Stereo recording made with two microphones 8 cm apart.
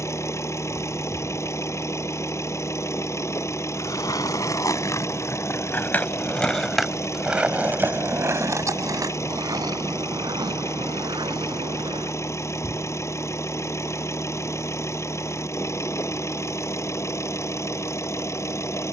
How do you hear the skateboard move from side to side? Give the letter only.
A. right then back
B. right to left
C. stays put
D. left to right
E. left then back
D.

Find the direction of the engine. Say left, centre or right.
left.